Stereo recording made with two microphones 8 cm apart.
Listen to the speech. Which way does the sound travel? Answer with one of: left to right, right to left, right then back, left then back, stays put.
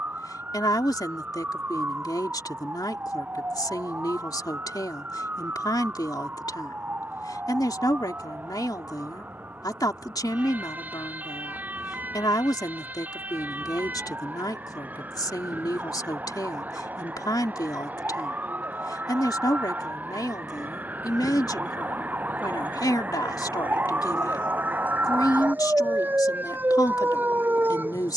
stays put.